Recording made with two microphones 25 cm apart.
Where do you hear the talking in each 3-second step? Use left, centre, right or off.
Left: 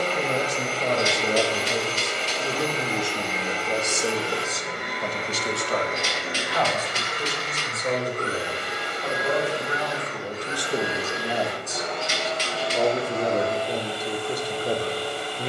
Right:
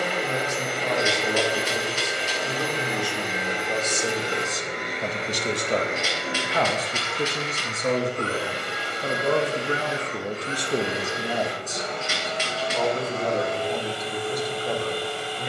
left, centre, right, right, left.